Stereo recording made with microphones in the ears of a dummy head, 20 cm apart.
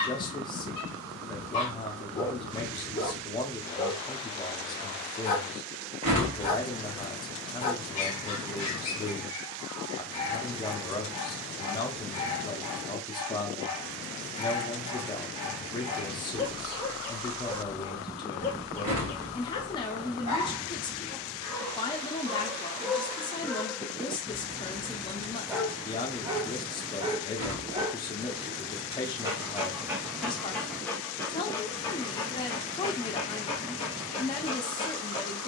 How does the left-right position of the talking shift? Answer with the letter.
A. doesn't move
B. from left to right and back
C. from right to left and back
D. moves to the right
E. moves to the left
A.